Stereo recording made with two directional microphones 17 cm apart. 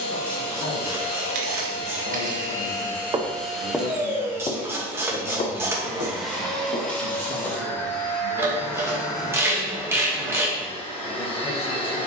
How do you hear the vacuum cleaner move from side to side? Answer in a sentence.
In this clip you hear the vacuum cleaner go right and come back.